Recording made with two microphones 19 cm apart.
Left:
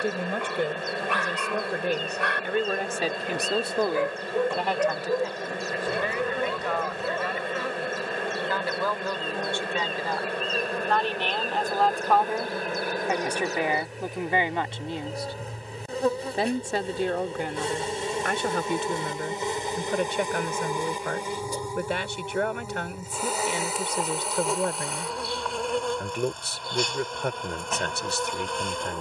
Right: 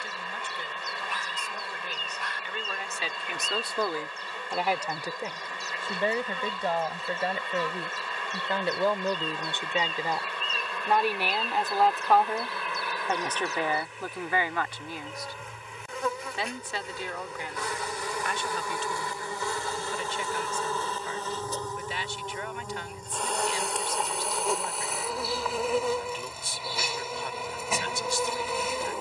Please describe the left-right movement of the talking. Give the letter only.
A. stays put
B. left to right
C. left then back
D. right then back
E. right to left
D.